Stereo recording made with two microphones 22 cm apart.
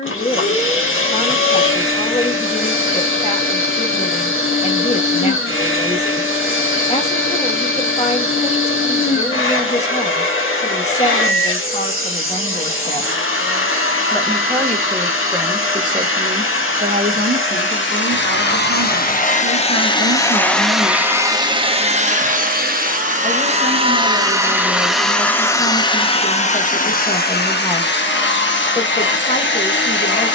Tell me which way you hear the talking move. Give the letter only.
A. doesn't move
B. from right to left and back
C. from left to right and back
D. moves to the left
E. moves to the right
C.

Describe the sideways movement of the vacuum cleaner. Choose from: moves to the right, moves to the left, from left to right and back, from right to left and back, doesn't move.
from left to right and back.